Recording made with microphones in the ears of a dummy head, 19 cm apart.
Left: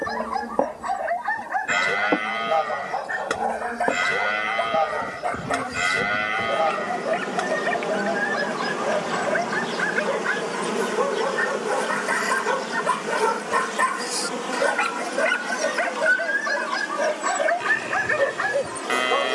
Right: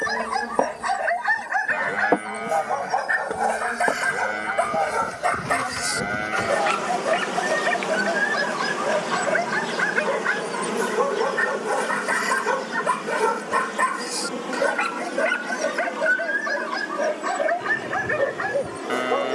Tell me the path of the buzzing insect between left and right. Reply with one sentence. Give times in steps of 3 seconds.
You can hear the buzzing insect on the right from 0 s, in the centre from 9 s and on the left from 12 s.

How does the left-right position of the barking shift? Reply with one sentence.
In this clip you hear the barking move to the left.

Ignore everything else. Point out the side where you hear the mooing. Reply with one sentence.
In this clip you hear the mooing on the left.